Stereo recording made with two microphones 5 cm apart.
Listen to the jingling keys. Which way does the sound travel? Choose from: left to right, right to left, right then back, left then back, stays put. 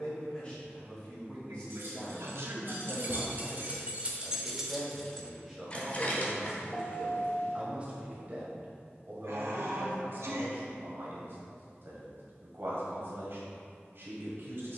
right to left.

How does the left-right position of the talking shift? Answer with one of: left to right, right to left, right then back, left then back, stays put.
left to right.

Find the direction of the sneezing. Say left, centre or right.
right.